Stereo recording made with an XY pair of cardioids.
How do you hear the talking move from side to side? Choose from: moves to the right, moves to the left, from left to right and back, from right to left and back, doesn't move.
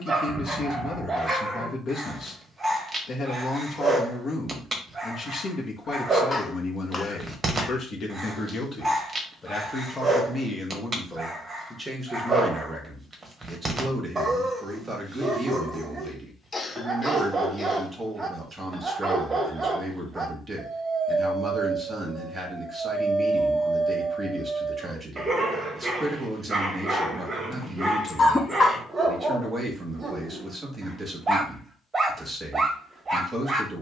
moves to the right.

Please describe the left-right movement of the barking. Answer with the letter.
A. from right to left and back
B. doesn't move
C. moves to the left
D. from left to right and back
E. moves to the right
B.